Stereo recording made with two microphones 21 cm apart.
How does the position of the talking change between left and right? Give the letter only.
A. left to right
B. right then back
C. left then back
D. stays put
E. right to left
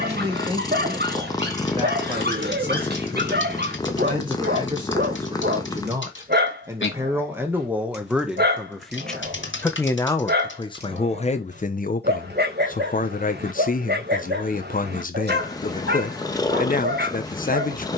E.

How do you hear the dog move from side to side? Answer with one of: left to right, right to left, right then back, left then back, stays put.
stays put.